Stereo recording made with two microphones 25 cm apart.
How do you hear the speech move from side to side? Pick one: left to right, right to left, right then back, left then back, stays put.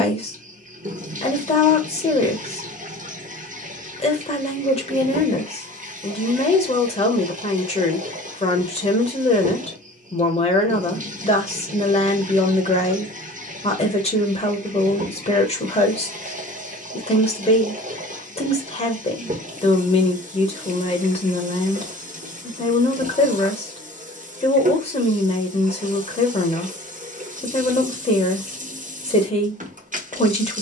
stays put.